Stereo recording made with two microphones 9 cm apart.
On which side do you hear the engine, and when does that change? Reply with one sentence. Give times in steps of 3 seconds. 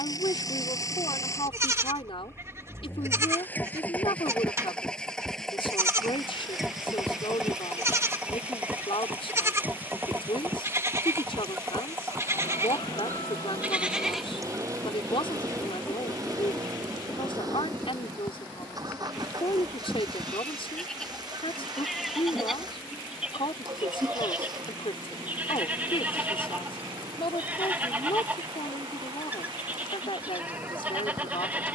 In this clip you hear the engine on the left from 0 s, in the centre from 3 s and on the right from 9 s.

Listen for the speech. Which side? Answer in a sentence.
You can hear the speech on the left.